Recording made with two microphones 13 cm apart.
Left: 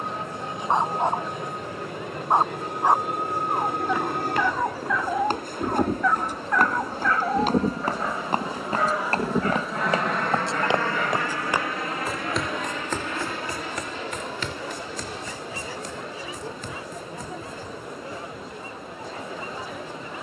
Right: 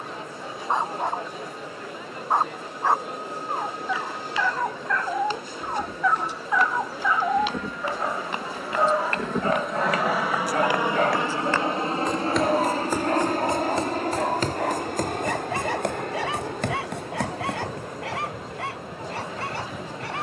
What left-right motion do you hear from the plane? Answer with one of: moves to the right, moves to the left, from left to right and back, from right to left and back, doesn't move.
moves to the right.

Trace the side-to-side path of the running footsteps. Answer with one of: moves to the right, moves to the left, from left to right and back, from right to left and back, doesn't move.
moves to the right.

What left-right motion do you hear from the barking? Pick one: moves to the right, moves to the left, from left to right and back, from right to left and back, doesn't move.
moves to the right.